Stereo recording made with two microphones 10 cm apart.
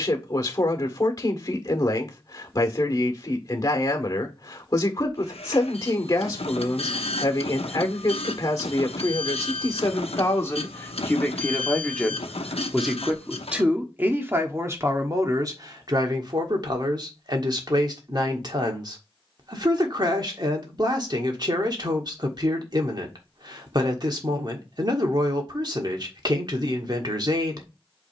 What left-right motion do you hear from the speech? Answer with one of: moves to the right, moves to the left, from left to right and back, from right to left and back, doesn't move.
moves to the right.